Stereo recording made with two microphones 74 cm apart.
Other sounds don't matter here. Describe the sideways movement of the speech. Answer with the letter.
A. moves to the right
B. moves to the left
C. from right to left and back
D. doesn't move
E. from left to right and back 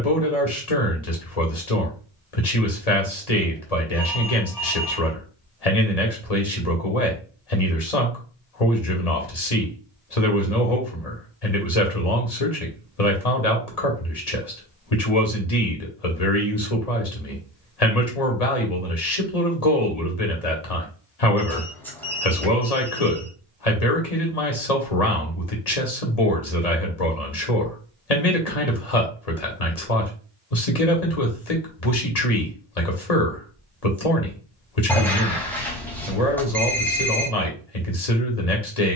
D.